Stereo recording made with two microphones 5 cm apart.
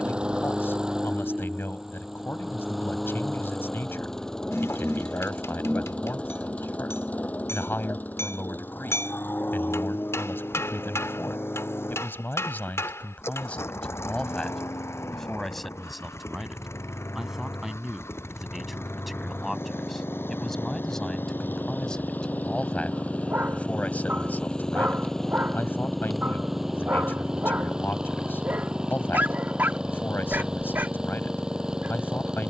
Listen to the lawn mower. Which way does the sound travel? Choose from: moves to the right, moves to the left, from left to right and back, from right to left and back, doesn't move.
from right to left and back.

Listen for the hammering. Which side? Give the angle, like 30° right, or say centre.
60° left.